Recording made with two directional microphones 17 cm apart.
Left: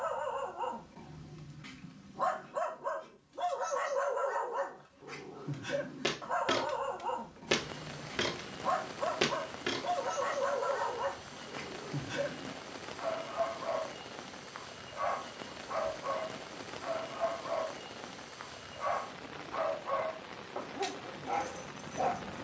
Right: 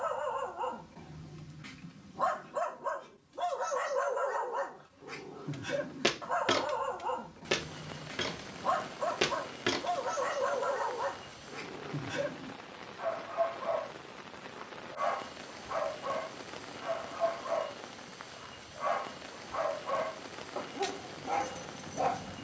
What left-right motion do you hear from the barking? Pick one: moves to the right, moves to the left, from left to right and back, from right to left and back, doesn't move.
doesn't move.